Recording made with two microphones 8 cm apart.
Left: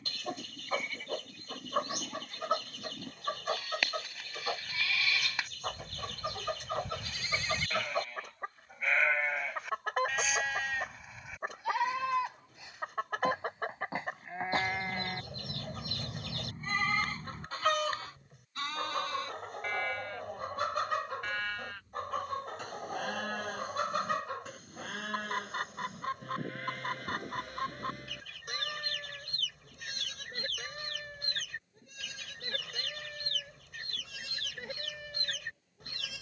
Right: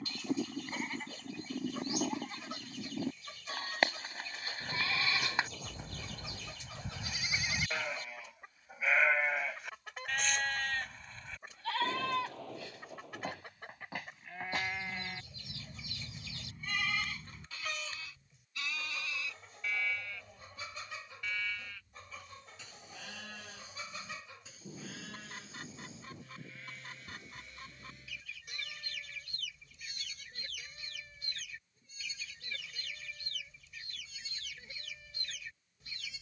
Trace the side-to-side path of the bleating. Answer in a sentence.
You can hear the bleating move to the left.